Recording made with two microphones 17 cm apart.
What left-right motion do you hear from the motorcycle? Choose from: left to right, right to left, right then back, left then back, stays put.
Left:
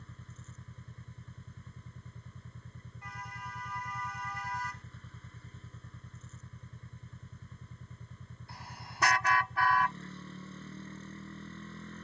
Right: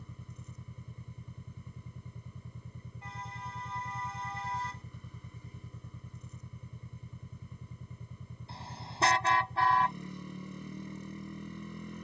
stays put.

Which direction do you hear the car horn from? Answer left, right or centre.
right.